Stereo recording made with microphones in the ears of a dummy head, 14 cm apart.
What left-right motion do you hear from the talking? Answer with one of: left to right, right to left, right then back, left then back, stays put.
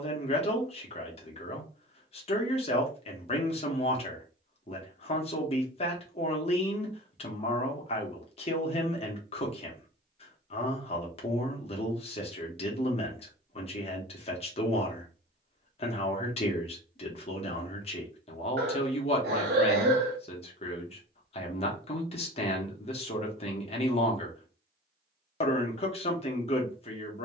stays put.